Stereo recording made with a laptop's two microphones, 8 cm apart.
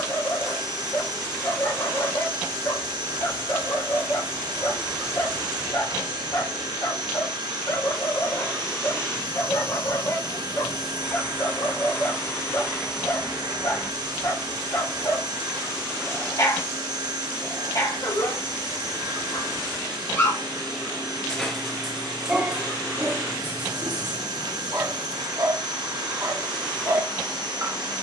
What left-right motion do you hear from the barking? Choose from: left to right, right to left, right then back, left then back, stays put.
left to right.